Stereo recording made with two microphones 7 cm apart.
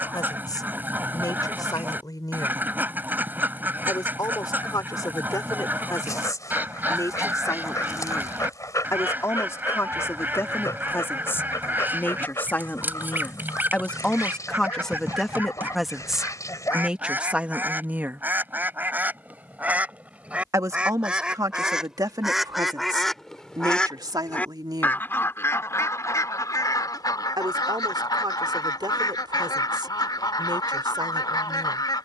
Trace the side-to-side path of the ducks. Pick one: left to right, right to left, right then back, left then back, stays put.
right to left.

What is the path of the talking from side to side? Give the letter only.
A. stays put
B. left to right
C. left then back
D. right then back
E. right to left
B.